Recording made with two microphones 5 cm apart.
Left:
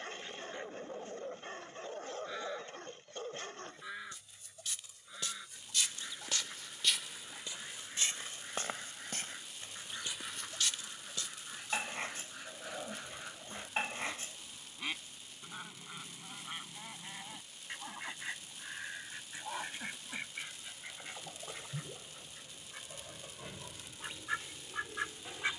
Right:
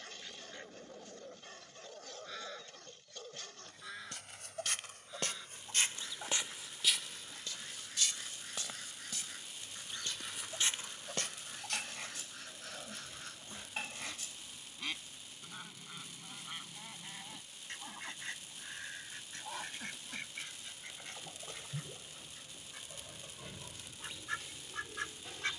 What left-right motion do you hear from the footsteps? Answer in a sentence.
You can hear the footsteps move from right to left and back again.